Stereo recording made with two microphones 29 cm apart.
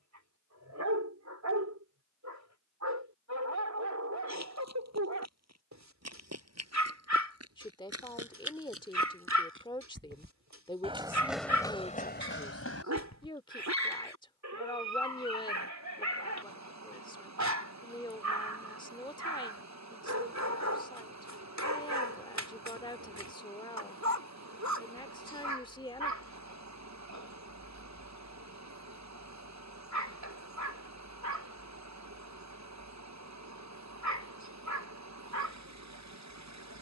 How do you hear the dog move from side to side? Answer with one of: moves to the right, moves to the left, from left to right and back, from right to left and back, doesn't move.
doesn't move.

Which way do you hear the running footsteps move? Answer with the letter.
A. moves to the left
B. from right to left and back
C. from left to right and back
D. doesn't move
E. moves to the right
A.